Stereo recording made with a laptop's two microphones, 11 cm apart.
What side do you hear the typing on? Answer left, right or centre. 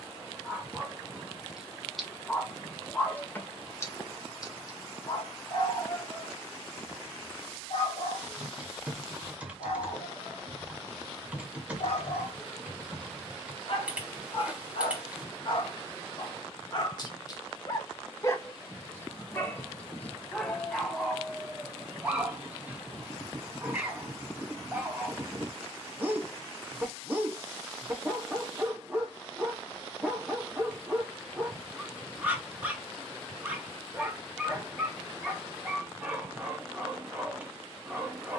centre.